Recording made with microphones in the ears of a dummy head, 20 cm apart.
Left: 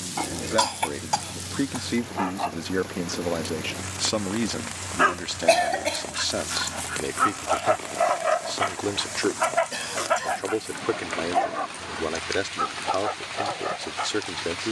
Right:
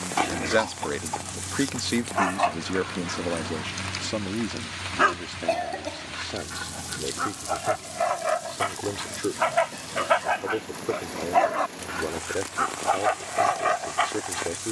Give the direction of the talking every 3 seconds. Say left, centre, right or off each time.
right, left, left, left, left.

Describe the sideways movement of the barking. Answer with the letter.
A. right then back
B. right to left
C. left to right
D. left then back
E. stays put
D.